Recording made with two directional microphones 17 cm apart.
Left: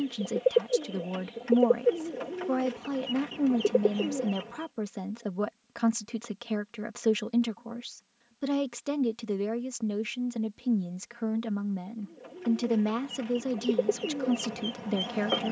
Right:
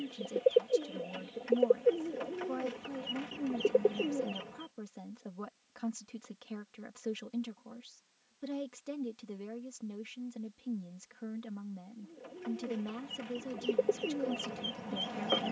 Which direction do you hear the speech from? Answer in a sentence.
In this clip you hear the speech on the left.